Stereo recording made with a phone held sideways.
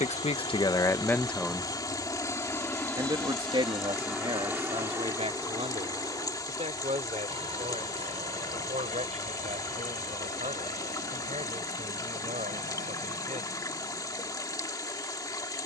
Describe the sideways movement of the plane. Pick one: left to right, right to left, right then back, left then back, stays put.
left to right.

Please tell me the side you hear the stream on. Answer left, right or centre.
left.